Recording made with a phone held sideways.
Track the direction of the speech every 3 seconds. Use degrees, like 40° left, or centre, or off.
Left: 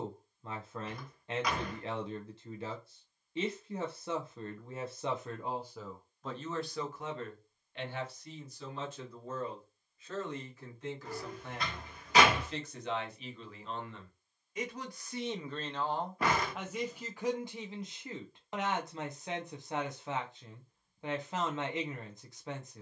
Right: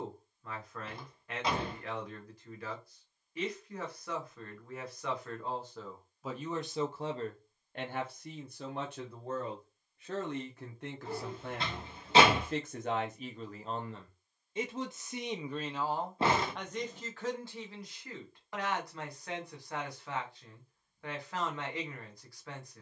30° left, 20° left, 40° right, 70° right, 40° right, centre, 20° left, 20° left.